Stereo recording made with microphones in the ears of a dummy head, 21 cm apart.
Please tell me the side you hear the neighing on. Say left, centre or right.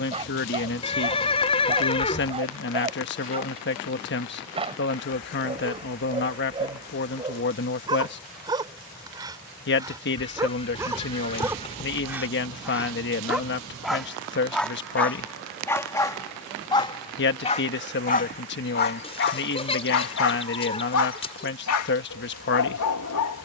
left.